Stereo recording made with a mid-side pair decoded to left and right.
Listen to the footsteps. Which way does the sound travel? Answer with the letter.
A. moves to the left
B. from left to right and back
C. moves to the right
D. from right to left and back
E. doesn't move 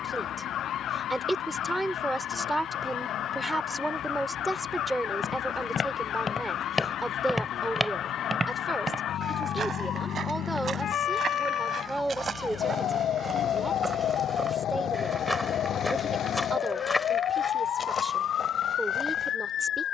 B.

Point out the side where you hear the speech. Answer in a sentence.
You can hear the speech in the centre.